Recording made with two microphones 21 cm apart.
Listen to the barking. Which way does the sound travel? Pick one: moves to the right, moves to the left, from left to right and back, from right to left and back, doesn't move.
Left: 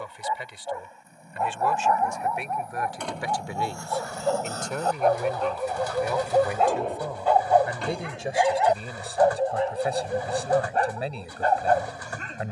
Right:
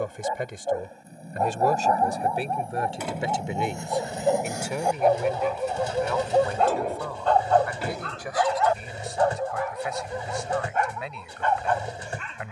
moves to the left.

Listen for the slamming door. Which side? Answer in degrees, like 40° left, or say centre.
10° right.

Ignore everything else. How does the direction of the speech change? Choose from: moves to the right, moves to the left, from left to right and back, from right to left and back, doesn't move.
moves to the left.